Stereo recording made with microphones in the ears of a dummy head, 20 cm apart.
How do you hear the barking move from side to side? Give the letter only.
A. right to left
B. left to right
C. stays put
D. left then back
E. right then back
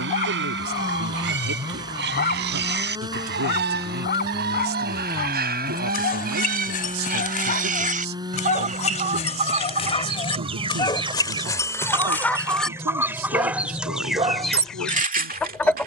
B.